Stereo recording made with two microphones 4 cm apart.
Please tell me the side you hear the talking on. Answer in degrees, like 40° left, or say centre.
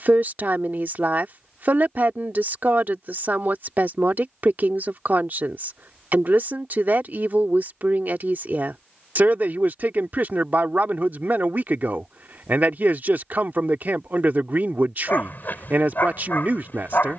50° right.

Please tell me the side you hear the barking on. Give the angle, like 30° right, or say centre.
50° left.